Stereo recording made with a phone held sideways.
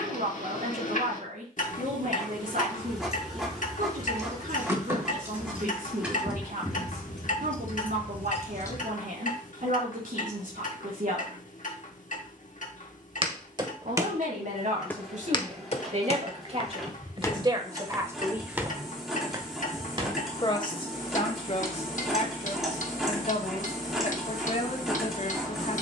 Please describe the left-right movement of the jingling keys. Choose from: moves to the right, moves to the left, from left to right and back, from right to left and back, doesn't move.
moves to the left.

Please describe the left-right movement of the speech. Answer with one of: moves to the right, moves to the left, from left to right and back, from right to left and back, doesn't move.
moves to the left.